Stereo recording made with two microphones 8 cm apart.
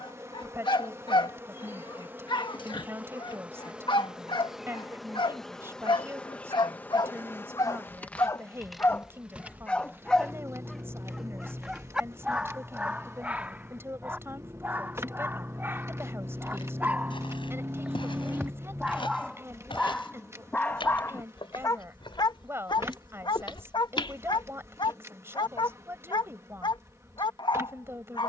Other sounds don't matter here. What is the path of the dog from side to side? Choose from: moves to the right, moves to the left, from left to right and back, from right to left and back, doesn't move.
from left to right and back.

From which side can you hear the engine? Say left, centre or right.
right.